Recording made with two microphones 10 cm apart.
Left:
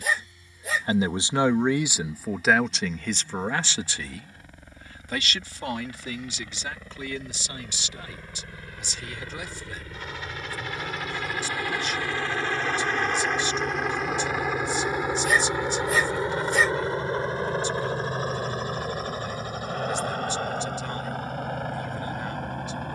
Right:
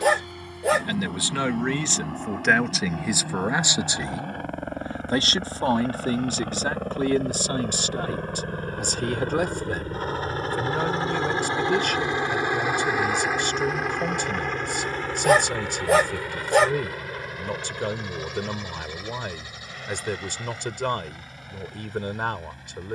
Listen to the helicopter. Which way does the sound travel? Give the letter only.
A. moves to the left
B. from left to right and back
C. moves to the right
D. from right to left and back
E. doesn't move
A.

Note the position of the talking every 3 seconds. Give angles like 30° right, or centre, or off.
10° left, 20° right, 50° right, 60° right, 60° right, 60° right, 60° right, 60° right.